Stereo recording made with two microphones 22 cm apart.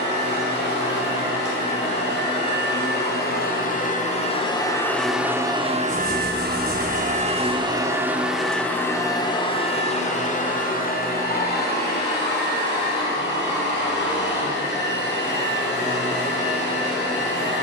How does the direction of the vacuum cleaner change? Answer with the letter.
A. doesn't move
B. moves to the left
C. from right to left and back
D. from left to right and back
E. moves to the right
D.